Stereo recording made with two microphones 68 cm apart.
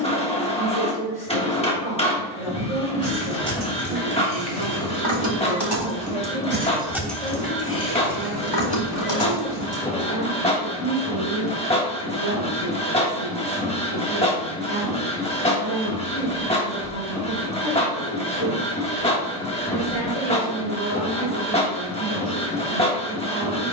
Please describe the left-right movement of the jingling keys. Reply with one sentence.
You can hear the jingling keys move from right to left.